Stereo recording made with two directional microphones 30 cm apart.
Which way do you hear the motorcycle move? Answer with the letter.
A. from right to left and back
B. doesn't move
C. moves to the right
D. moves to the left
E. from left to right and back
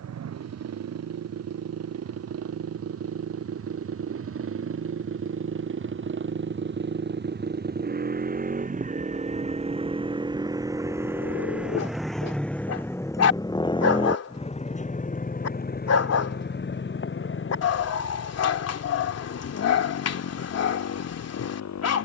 D.